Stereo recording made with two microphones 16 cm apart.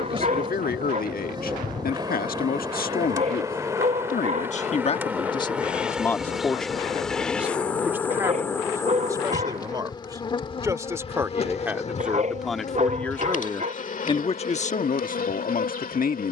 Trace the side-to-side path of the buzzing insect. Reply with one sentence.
You can hear the buzzing insect travel towards the left.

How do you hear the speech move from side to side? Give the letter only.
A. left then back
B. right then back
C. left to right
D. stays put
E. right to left
B.